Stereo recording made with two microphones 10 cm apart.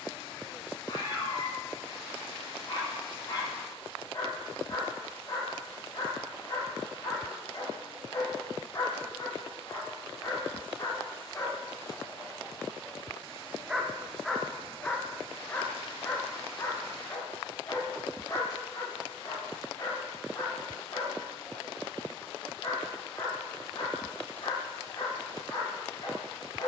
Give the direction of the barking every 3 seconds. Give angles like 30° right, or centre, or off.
40° left, 40° left, 40° left, 30° left, 10° left, 30° left, 40° left, 40° left, 40° left.